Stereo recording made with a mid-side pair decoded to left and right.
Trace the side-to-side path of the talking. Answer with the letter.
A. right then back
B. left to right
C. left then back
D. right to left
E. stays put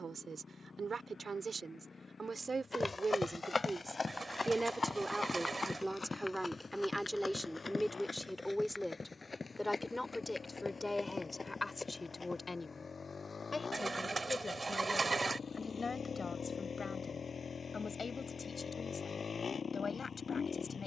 D.